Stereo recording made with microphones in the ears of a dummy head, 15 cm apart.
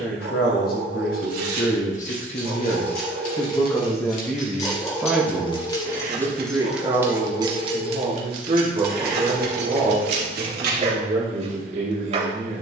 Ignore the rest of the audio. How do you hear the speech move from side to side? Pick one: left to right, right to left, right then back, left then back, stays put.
left to right.